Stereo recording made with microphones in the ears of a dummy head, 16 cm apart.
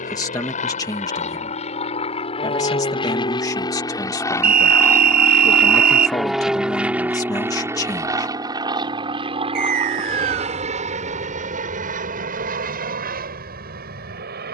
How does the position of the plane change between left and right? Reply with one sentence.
In this clip you hear the plane go from the left side to the right.